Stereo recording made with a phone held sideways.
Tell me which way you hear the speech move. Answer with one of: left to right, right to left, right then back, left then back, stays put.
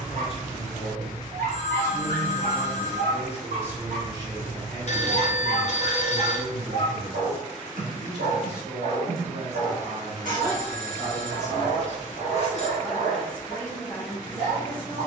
right then back.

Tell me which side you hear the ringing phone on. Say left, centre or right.
left.